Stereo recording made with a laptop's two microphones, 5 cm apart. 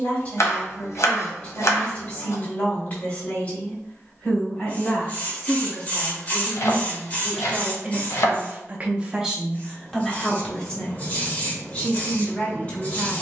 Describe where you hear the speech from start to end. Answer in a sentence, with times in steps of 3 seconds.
You can hear the speech on the left from 0 s, in the centre from 6 s and on the left from 12 s.